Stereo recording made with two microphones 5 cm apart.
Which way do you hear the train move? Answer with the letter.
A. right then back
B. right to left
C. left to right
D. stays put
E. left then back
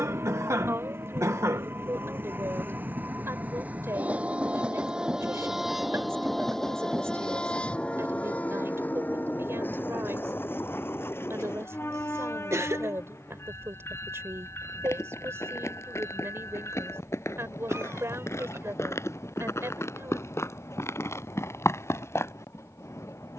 B.